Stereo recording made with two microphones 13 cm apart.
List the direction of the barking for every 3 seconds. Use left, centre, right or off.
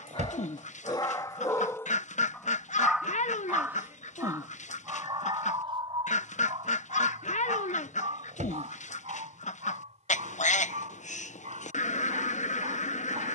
left, right, right, right, right.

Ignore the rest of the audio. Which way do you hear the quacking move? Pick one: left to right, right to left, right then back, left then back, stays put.
stays put.